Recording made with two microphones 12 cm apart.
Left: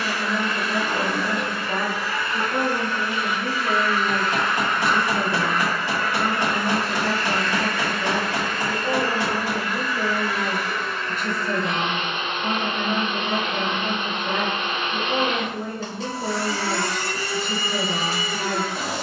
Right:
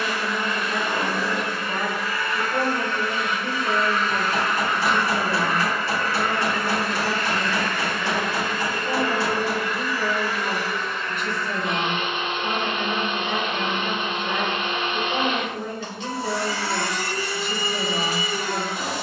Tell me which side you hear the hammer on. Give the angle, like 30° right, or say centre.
20° left.